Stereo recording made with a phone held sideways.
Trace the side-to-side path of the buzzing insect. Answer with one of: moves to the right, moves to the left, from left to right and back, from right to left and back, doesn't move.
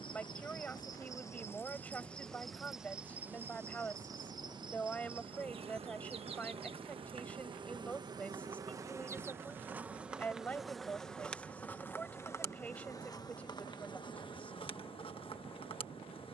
from left to right and back.